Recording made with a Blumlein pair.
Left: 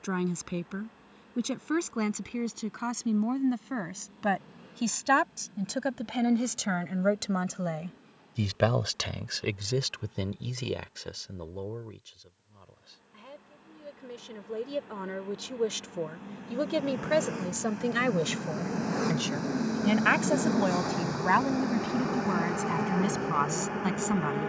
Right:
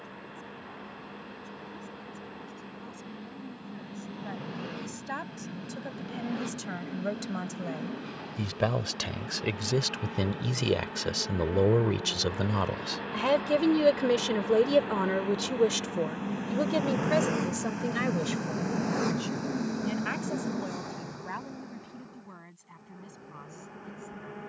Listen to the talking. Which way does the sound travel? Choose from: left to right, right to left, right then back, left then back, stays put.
right then back.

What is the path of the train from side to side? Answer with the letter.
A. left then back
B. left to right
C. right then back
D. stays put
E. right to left
E.